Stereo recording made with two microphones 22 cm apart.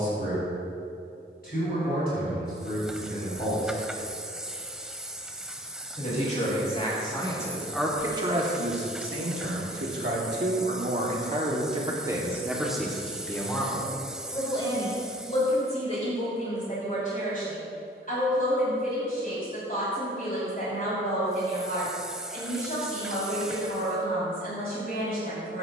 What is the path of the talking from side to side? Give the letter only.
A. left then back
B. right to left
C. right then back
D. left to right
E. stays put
C.